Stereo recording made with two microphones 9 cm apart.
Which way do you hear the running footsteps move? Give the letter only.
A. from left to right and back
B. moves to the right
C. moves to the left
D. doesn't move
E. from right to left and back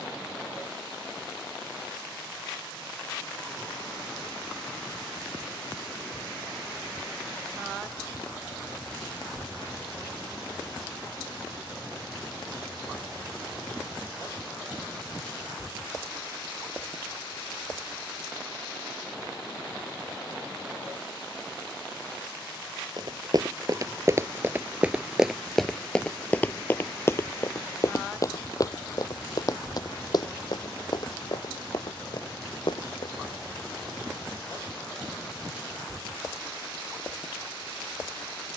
C.